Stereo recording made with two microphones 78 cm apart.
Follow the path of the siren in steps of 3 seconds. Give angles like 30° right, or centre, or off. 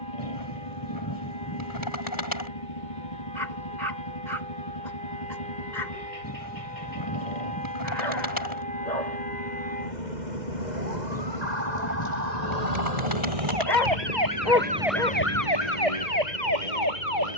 70° right, 70° right, 70° right, 60° right, 40° right, 50° left.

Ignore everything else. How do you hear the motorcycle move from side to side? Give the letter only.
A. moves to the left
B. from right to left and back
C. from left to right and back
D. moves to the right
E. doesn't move
E.